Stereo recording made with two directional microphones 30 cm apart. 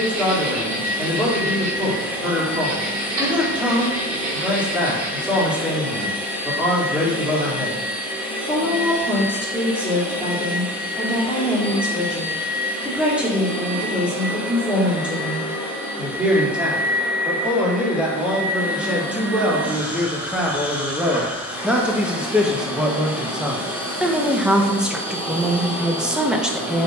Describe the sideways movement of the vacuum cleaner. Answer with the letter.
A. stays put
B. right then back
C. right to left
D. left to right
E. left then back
A.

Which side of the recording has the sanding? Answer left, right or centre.
right.